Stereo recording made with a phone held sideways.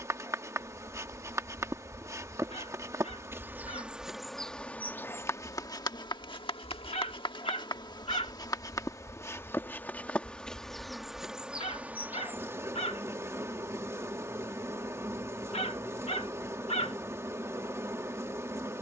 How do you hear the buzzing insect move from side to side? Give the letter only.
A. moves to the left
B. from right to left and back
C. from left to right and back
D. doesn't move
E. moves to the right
B.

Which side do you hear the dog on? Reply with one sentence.
You can hear the dog on the left.